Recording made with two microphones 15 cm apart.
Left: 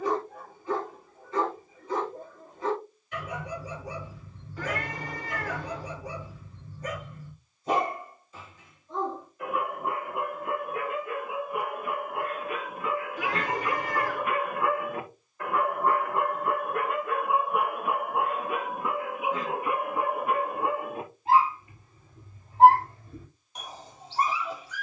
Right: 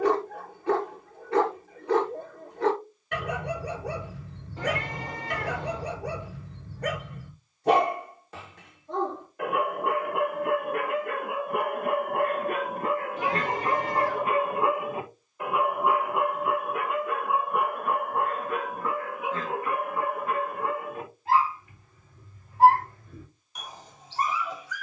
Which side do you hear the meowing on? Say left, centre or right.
right.